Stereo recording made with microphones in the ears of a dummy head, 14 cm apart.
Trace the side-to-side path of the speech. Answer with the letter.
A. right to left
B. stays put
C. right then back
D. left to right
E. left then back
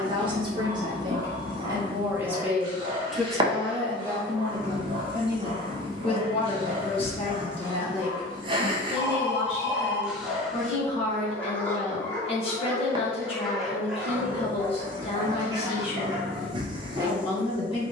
A.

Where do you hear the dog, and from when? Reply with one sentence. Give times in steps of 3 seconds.
You can hear the dog on the right from 0 s, in the centre from 9 s and on the right from 15 s.